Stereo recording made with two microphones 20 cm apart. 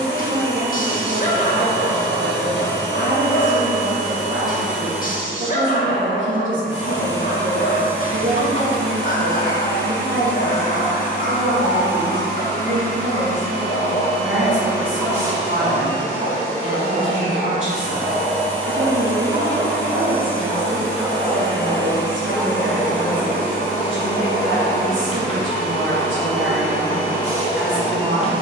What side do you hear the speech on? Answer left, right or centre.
right.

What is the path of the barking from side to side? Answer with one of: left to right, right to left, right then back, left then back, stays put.
right then back.